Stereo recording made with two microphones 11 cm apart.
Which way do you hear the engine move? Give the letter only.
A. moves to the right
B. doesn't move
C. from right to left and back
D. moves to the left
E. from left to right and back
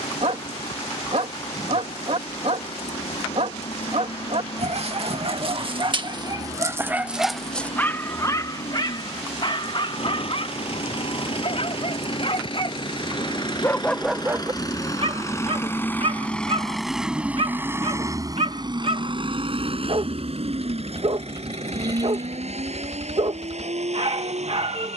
A.